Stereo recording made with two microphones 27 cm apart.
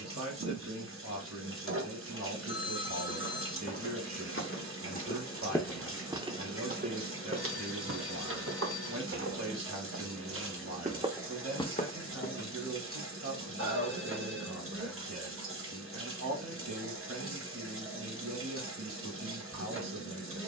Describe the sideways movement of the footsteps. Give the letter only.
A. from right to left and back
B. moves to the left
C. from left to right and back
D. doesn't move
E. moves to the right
C.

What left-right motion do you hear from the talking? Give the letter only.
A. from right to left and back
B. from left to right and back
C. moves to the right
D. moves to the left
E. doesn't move
E.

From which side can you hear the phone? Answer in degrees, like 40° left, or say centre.
50° left.